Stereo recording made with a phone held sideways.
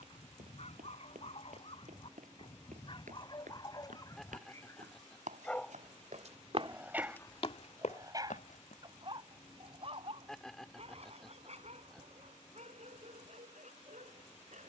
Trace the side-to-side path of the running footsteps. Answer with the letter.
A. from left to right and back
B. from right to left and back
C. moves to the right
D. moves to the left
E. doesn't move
D.